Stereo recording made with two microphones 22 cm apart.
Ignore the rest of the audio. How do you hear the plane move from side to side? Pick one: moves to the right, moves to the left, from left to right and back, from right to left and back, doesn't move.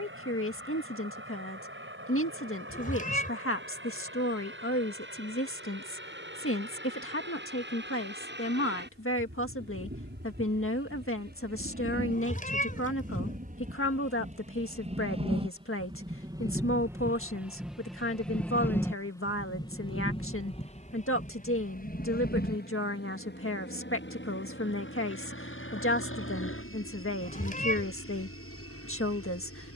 moves to the left.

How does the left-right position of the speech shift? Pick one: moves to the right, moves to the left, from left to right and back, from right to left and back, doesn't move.
doesn't move.